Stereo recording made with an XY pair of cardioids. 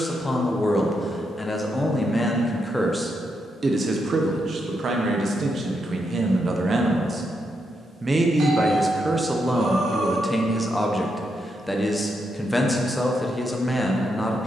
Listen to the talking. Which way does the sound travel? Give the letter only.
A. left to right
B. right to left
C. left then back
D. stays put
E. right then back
E.